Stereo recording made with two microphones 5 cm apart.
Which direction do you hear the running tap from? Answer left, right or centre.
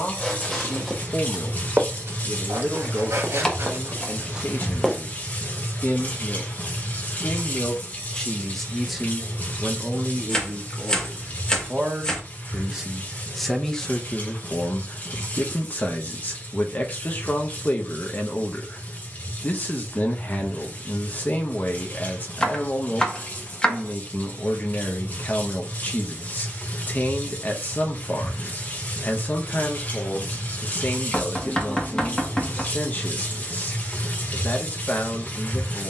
left.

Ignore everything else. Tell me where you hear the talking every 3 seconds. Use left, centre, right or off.
left, left, left, right, centre, left, left, left, left, left, left, left.